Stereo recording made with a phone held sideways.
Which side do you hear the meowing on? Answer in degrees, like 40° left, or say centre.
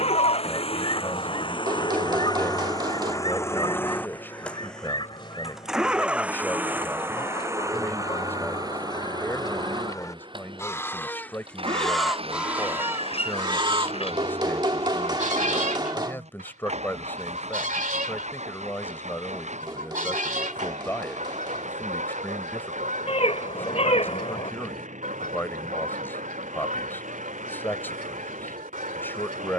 50° left.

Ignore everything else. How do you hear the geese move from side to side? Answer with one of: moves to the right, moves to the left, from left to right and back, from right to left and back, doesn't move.
moves to the right.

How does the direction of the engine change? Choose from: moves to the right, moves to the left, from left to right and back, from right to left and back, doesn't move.
moves to the right.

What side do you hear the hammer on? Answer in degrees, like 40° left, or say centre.
30° right.